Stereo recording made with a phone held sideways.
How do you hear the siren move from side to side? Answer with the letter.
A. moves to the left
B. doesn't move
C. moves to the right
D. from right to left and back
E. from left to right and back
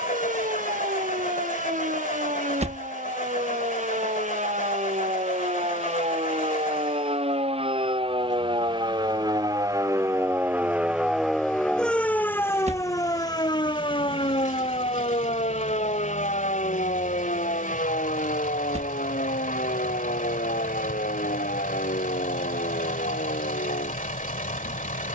A.